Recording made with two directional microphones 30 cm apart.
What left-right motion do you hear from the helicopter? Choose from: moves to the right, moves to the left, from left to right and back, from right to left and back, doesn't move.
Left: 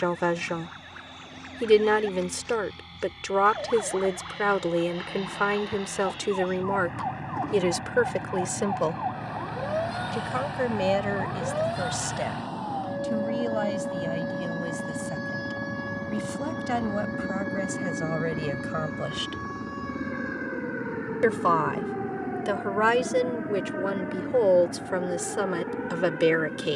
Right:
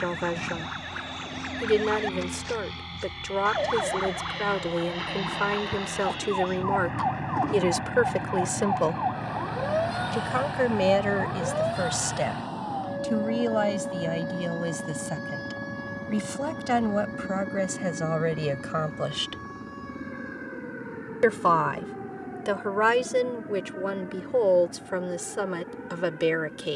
moves to the left.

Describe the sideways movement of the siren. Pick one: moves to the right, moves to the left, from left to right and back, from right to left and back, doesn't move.
moves to the left.